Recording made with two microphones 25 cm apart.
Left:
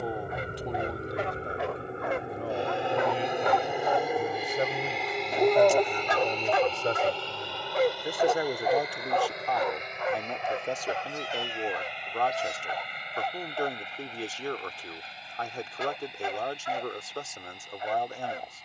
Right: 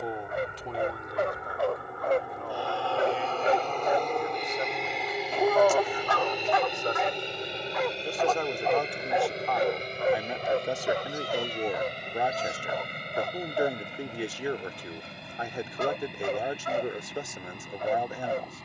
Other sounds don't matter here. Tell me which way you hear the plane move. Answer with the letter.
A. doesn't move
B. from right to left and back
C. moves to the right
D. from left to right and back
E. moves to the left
C.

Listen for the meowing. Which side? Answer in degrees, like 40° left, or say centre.
10° left.